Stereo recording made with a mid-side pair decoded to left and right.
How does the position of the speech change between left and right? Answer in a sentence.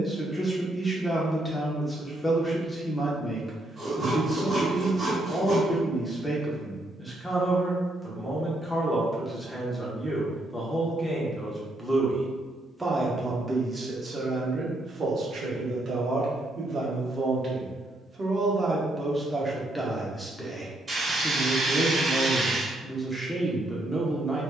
You can hear the speech move from left to right and back again.